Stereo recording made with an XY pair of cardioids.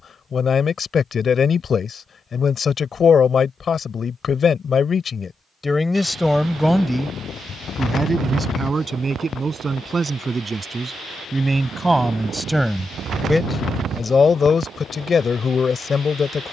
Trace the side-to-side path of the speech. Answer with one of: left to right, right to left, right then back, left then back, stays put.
right then back.